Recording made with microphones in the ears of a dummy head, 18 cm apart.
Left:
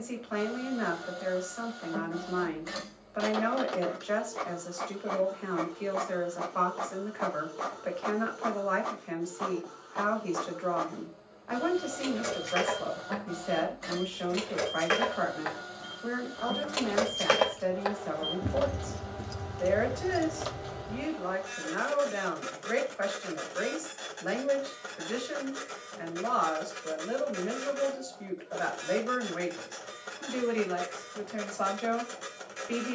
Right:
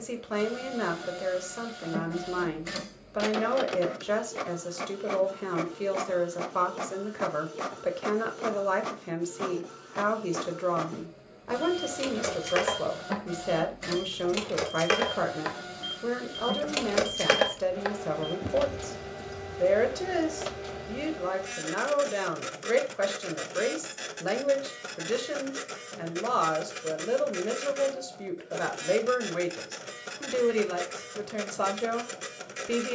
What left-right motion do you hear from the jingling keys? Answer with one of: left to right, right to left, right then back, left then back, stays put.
right to left.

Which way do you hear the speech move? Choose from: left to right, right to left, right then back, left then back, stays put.
stays put.